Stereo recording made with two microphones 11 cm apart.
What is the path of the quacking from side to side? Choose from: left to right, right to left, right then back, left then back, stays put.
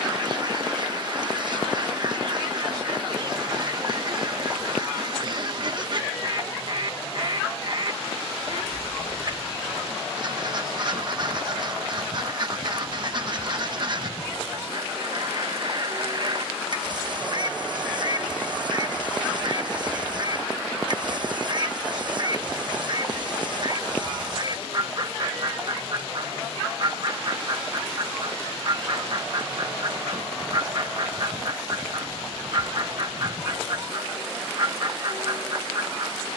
stays put.